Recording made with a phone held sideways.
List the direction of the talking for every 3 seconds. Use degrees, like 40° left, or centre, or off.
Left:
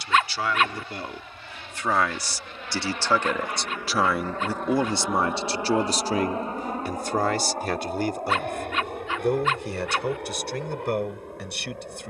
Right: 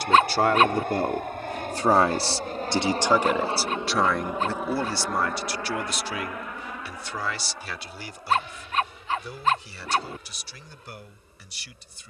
40° right, 10° left, 50° left, 70° left.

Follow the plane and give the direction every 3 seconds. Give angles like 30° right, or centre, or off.
60° right, 10° right, 40° left, 60° left.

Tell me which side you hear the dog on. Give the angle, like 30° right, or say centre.
40° right.